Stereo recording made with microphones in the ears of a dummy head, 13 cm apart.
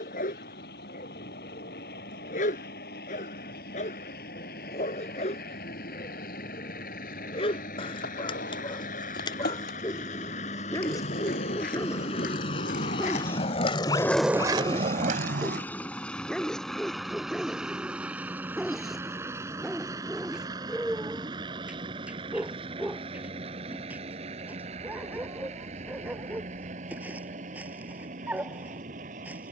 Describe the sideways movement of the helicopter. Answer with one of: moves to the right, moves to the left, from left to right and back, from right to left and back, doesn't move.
moves to the right.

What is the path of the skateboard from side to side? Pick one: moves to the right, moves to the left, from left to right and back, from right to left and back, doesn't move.
moves to the right.